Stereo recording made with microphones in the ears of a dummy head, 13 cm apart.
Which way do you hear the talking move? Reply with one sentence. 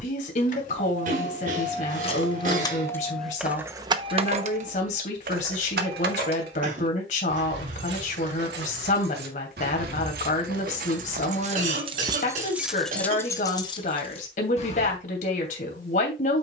In this clip you hear the talking stay put.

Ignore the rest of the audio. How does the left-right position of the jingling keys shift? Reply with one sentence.
In this clip you hear the jingling keys move from left to right and back again.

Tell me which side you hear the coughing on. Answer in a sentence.
In this clip you hear the coughing on the right.